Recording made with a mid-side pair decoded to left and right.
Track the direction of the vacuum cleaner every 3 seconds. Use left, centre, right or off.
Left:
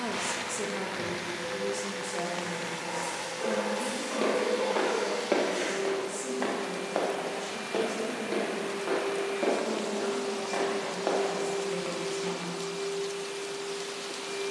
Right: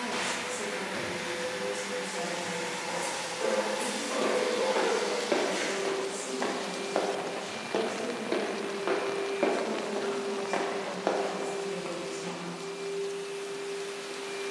right, right, centre, left, left.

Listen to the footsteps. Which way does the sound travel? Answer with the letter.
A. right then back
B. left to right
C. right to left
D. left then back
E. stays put
A.